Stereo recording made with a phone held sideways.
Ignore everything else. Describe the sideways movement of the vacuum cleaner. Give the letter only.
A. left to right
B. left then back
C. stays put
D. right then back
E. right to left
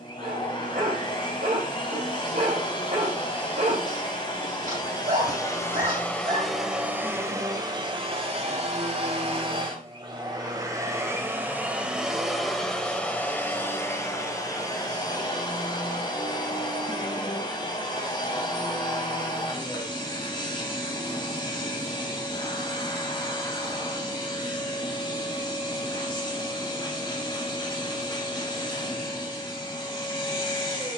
D.